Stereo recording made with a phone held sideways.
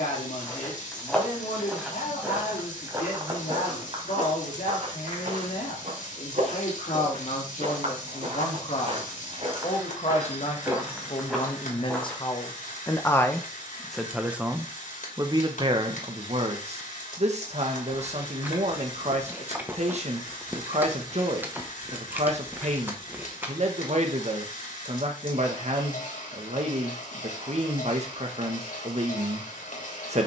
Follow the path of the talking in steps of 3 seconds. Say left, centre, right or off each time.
left, left, left, left, centre, right, right, right, right, right.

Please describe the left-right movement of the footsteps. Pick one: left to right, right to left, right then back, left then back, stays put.
right then back.